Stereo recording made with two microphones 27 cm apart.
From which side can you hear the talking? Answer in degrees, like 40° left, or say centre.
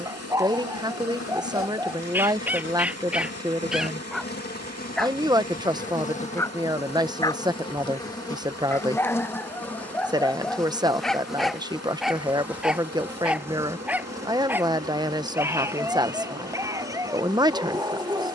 20° right.